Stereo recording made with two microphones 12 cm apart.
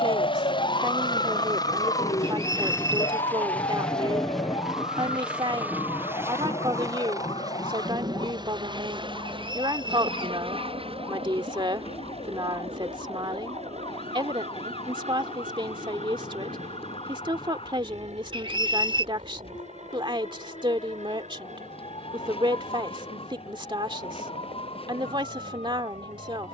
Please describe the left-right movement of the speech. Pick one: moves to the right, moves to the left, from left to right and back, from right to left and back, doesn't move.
doesn't move.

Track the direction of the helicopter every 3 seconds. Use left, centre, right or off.
left, centre, right, right, right, right, right, right, right.